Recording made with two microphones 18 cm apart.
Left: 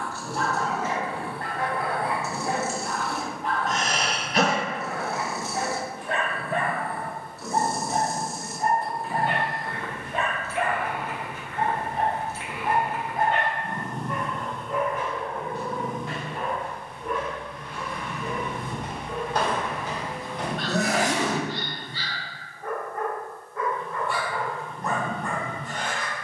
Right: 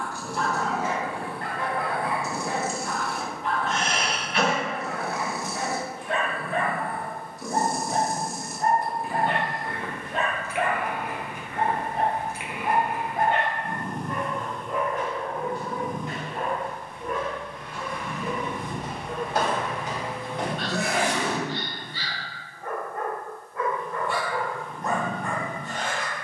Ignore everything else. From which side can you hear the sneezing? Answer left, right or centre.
left.